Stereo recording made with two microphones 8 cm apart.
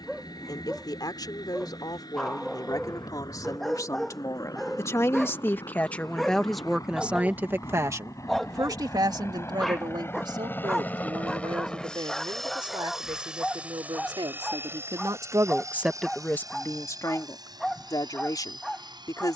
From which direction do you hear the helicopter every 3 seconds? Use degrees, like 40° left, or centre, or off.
70° left, 60° left, 50° left, 30° left, 10° right, 50° right, 60° right.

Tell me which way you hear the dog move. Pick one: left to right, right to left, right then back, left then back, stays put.
stays put.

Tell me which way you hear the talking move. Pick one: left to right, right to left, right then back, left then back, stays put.
right then back.